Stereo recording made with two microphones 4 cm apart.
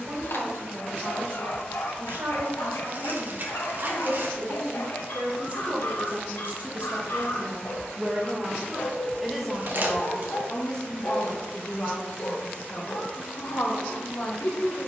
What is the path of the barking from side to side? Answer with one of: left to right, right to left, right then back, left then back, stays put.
stays put.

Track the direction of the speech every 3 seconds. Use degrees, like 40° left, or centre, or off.
60° right, 50° right, 30° right, 20° left, 50° left.